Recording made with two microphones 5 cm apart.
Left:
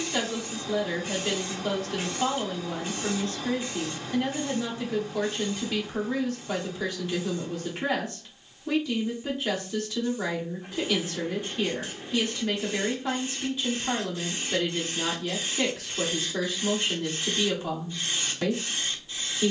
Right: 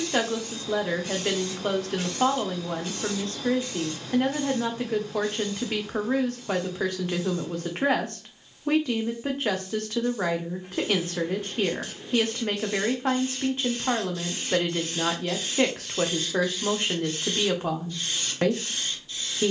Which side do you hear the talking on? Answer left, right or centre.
right.